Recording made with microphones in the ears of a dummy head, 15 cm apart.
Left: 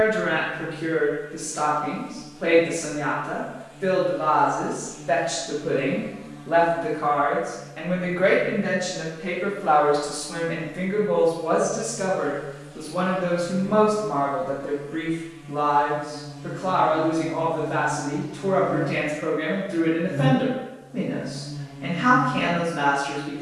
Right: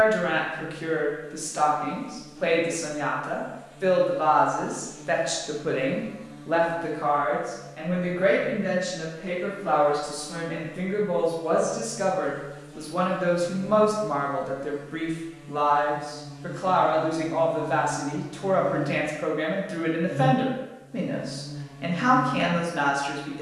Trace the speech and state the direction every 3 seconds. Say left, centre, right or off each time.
right, right, centre, centre, right, right, right, right.